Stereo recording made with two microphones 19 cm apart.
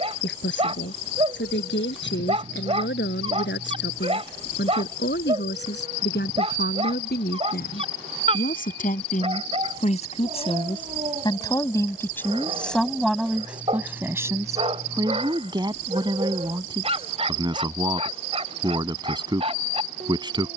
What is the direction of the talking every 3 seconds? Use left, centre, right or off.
left, left, left, left, centre, right, right.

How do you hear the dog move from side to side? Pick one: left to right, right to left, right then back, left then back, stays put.
stays put.